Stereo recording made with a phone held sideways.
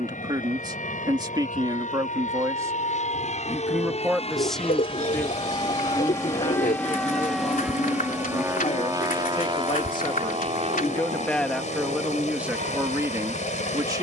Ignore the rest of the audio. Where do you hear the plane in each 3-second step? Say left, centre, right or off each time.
left, left, centre, right, right.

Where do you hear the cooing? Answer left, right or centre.
left.